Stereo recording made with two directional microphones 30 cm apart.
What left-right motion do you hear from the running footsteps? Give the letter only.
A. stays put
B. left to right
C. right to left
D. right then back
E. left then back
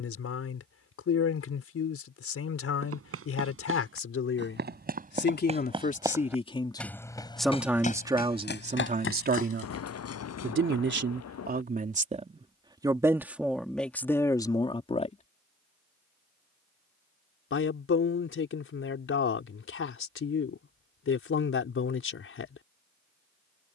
C.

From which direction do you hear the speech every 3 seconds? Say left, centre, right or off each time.
left, left, centre, right, centre, left, left, left.